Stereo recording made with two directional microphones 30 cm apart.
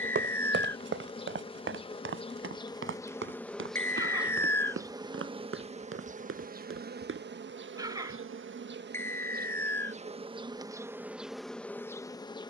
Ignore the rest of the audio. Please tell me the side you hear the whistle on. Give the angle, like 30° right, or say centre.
10° left.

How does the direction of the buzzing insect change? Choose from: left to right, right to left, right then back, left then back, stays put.
right then back.